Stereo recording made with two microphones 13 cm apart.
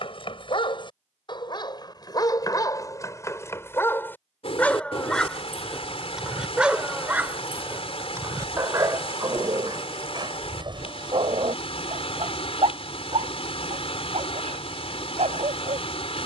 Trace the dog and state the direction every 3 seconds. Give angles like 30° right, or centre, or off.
30° left, 10° left, 20° right, 30° right, 50° right, 50° right.